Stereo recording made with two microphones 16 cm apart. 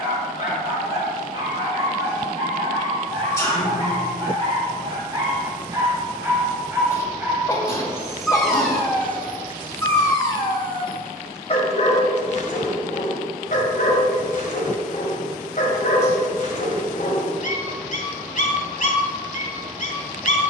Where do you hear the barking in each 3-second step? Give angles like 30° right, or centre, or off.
40° right, 30° right, 10° right, 30° left, 50° left, 60° left, 60° left.